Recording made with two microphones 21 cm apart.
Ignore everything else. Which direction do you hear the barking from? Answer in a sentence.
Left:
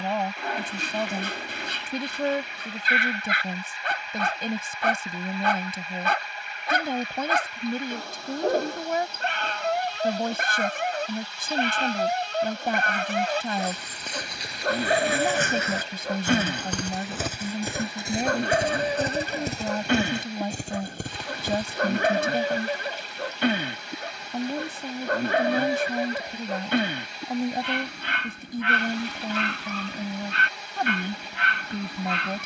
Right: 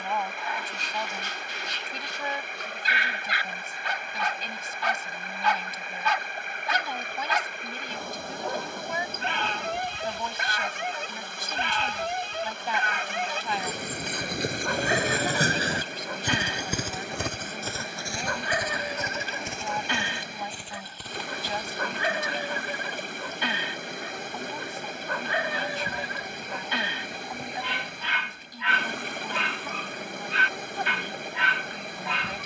In this clip you hear the barking on the left.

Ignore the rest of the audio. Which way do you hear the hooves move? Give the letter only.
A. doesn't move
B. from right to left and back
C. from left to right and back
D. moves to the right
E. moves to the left
E.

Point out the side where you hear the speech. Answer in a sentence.
In this clip you hear the speech on the left.